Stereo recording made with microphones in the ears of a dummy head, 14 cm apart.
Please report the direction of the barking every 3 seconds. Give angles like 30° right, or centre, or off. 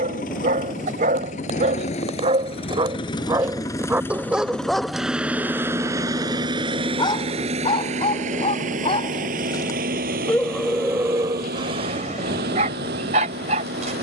50° right, 10° right, 30° left, centre, 50° right.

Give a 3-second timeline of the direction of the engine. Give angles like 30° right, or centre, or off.
50° left, 10° left, 40° right, 60° right, 70° right.